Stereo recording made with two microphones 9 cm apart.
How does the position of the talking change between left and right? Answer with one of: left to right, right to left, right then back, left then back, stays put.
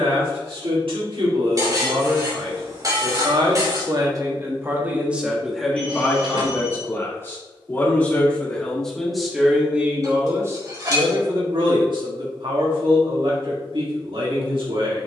left then back.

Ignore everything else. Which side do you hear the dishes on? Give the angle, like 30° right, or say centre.
40° right.